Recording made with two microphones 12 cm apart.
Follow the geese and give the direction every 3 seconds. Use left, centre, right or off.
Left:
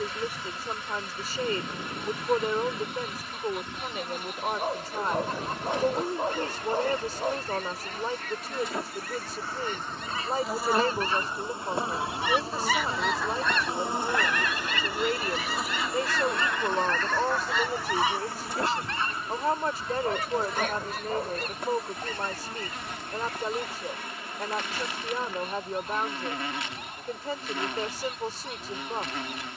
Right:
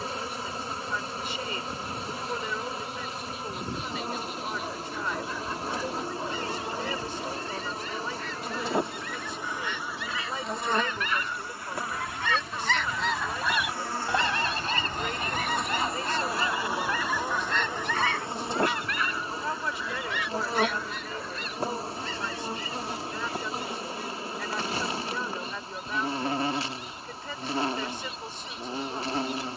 left, left, left, left, centre, right, left, left, left, left.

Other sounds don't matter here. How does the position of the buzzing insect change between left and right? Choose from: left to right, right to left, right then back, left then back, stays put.
left then back.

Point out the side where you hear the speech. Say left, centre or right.
left.